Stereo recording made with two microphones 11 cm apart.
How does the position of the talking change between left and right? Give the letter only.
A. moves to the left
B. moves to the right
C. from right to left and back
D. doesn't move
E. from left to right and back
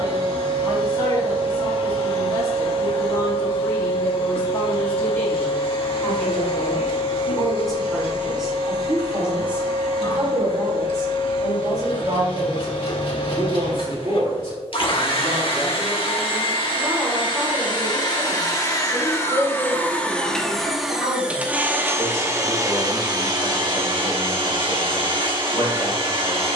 E.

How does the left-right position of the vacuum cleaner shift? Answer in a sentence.
You can hear the vacuum cleaner go from the left side to the right.